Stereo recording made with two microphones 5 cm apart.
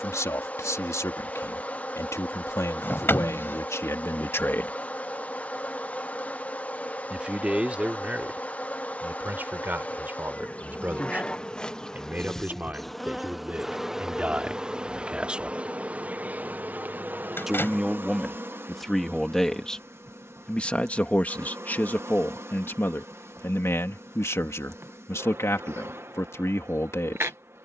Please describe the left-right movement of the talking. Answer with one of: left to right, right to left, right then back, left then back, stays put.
right then back.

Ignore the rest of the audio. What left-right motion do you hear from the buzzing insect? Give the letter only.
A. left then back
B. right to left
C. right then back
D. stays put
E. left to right
E.